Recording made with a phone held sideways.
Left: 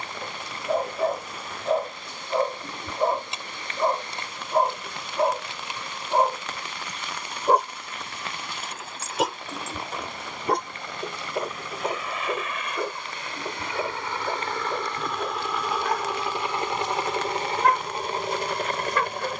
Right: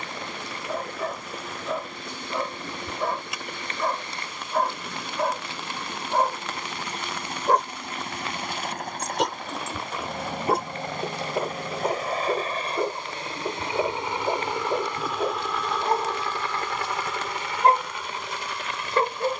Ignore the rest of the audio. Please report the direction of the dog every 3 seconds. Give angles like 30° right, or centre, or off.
30° left, 20° left, 10° left, centre, 20° right, 30° right, 30° right.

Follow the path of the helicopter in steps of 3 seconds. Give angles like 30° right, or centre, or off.
70° right, 70° right, 60° right, 50° right, 30° right, 20° left, 40° left.